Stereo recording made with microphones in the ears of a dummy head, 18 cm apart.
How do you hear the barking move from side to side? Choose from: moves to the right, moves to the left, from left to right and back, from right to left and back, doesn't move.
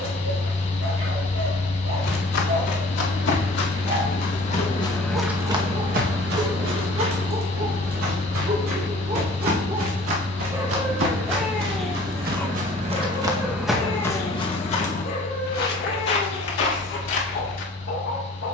moves to the left.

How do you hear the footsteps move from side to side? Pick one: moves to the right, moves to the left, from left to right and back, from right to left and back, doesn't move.
from left to right and back.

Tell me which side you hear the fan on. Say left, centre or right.
left.